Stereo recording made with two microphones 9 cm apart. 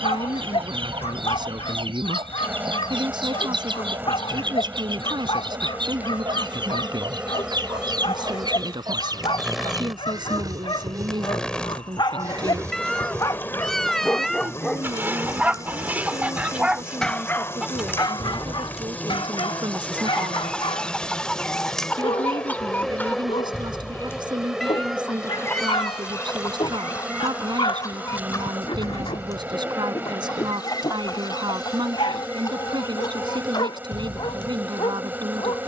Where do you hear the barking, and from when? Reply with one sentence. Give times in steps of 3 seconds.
You can hear the barking on the left from 0 s, in the centre from 15 s and on the left from 18 s.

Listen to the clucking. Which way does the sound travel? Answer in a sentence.
You can hear the clucking go from the right side to the left.